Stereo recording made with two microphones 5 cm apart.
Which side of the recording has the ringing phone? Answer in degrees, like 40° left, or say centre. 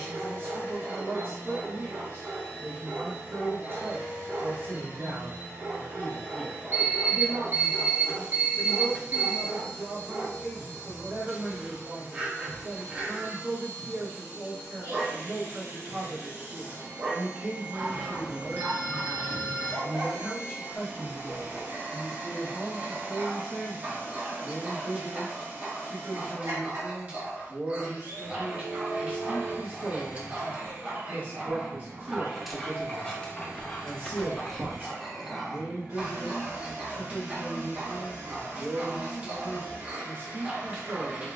50° right.